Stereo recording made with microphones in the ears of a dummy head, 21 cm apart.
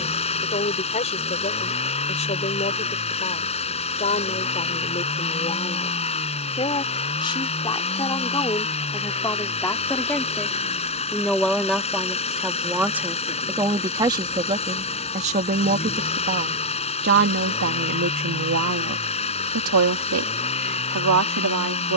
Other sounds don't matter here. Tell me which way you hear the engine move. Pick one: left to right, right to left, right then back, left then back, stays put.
stays put.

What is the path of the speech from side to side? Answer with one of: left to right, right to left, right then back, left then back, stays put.
left to right.